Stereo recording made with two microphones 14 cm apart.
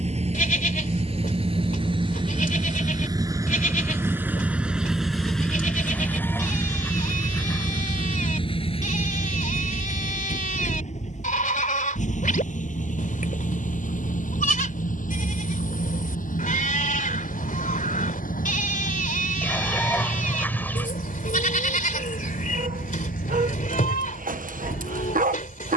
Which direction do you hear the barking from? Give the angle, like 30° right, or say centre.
70° right.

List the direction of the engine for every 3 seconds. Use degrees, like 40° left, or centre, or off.
40° right, 10° right, 30° left, 50° left, 60° left, 70° left, 70° left, 80° left, 80° left.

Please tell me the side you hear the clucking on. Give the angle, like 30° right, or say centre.
10° left.